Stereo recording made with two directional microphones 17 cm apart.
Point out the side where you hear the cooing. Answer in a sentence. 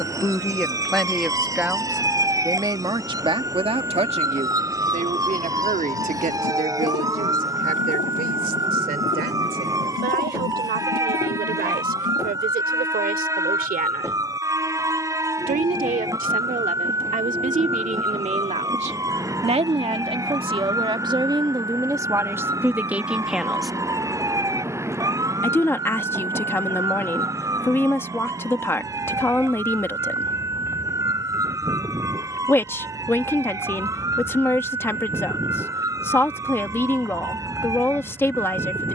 In this clip you hear the cooing on the left.